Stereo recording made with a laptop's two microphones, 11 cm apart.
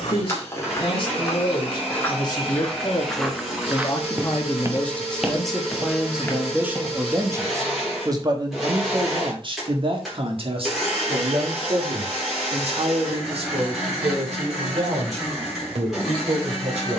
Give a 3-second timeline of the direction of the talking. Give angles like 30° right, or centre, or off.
40° left, 10° left, 20° right, 60° right, 70° right, 80° right.